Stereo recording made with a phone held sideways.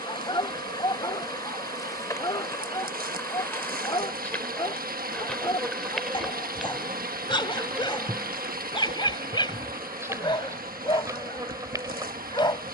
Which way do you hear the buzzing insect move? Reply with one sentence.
In this clip you hear the buzzing insect move from left to right.